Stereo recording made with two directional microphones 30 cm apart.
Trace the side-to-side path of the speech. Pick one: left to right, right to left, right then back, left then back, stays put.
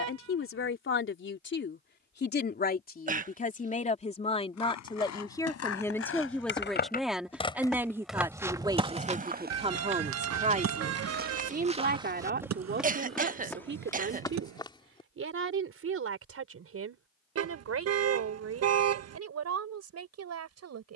left to right.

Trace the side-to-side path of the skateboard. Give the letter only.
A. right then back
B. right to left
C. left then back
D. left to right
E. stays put
D.